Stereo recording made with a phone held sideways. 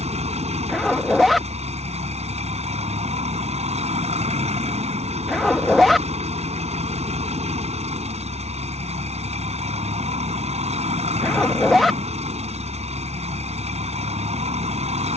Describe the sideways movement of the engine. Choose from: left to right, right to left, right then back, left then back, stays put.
stays put.